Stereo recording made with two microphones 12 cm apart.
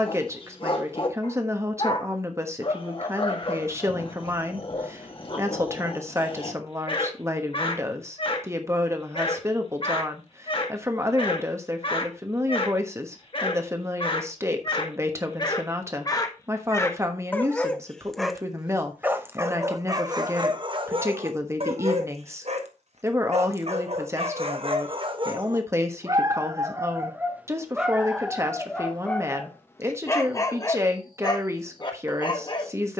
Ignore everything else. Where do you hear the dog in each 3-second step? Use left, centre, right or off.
left, left, left, left, left, left, right, right, right, centre, left.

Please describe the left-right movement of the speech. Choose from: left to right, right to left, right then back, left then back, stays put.
stays put.